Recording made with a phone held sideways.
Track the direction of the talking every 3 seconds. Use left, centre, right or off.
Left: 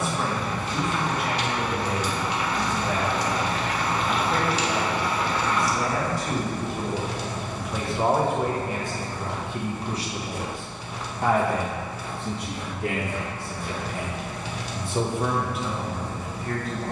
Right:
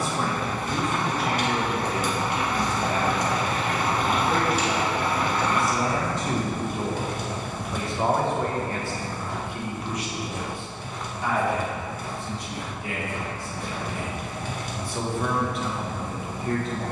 right, right, centre, left, left, centre.